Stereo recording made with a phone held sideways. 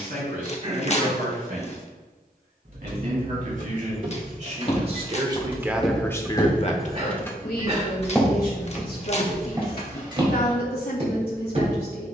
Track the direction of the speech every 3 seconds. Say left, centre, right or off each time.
right, right, left, left.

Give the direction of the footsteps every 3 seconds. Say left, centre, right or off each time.
off, left, centre, right.